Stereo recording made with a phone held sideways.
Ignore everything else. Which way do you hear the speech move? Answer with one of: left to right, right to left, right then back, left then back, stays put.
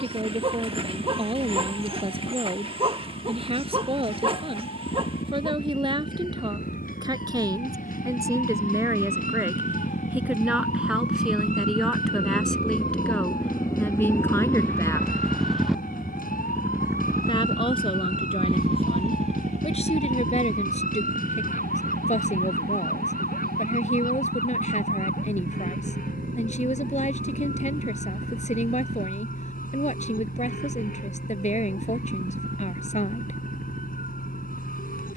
right to left.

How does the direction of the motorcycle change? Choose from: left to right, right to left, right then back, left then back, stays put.
left to right.